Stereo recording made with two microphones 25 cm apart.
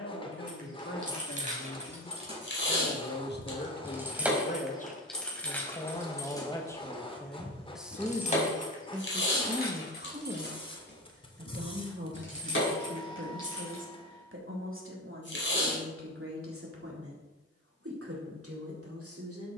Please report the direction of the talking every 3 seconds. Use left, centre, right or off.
left, left, centre, right, right, right, right.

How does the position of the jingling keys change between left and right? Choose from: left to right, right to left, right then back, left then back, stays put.
right to left.